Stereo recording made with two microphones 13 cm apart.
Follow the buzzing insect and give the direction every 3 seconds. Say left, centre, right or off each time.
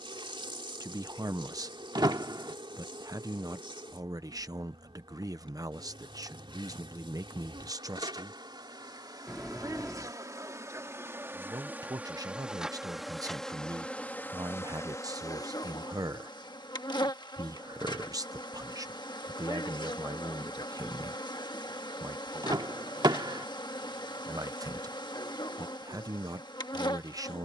right, right, right, right, centre, left, left, left, left.